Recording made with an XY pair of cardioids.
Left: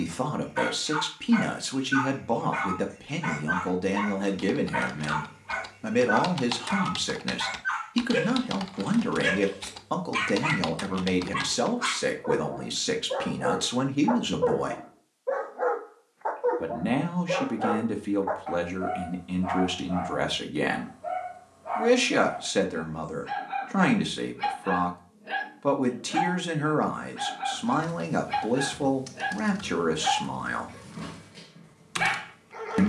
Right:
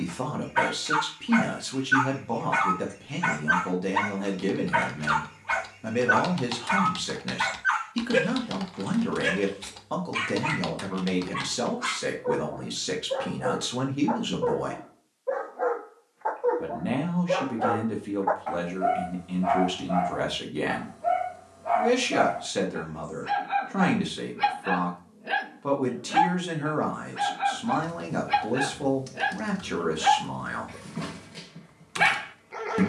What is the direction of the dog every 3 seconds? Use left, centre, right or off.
right, right, right, left, left, centre, right, right, right, right, right.